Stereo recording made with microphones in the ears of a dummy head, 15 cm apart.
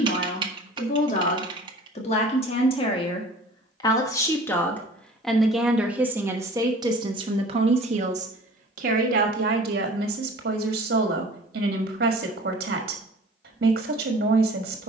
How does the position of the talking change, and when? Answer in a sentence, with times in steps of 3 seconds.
In this clip you hear the talking on the left from 0 s, in the centre from 3 s and on the right from 6 s.